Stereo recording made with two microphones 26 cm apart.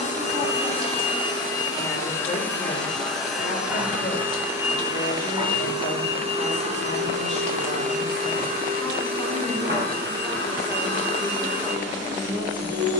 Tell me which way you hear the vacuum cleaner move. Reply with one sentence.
In this clip you hear the vacuum cleaner move to the right.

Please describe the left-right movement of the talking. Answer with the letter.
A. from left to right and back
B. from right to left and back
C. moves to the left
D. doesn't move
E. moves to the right
B.